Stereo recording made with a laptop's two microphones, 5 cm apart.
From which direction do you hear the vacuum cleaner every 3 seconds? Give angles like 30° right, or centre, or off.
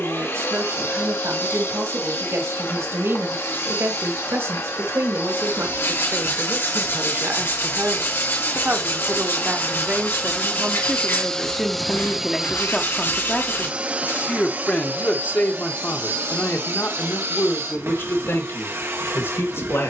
60° left, 60° left, 50° left, 20° left, 30° right, 60° right, 60° right.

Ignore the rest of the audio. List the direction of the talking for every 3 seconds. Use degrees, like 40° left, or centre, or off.
70° right, 60° right, 50° right, 20° right, 20° left, 40° left, 60° left.